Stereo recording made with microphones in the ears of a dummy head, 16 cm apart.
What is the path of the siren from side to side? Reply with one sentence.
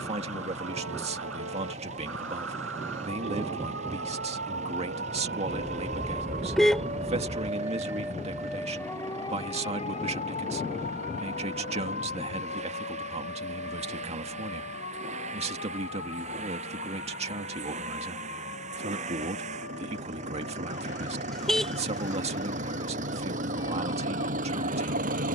In this clip you hear the siren move to the left.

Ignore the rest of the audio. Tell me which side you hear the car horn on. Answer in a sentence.
You can hear the car horn in the centre.